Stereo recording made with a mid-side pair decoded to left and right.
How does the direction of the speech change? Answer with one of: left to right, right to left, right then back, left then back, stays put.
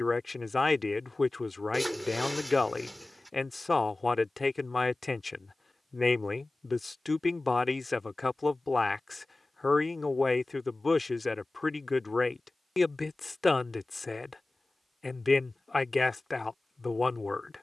stays put.